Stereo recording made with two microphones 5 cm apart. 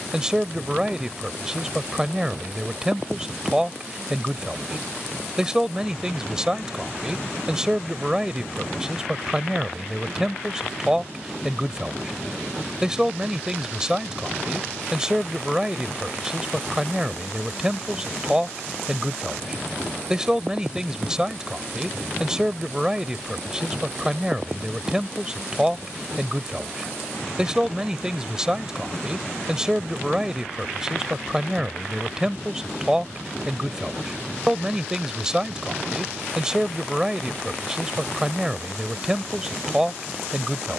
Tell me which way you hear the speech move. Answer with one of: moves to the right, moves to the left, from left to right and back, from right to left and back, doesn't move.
doesn't move.